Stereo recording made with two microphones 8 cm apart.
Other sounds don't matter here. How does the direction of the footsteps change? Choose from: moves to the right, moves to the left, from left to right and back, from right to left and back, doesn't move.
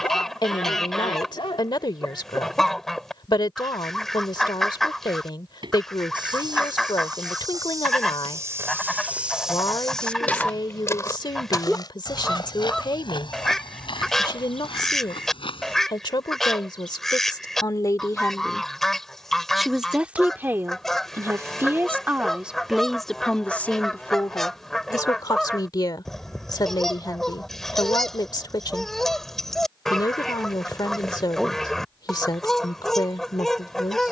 moves to the left.